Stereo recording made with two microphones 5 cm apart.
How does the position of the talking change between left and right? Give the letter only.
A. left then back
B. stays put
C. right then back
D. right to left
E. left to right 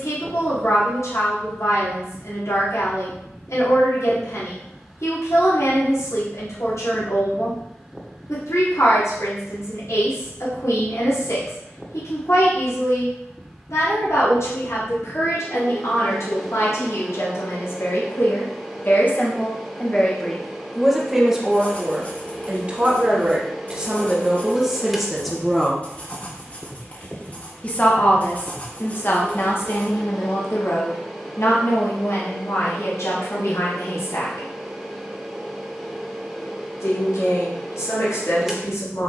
C.